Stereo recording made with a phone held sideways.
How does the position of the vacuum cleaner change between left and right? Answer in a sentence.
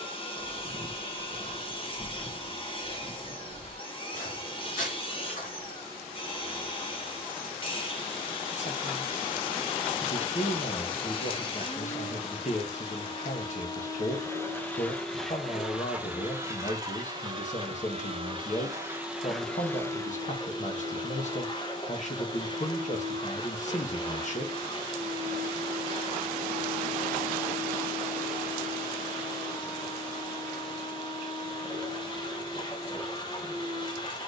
You can hear the vacuum cleaner go right and come back.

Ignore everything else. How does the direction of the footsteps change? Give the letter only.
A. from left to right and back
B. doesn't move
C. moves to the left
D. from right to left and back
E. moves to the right
C.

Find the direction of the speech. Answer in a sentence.
You can hear the speech on the left.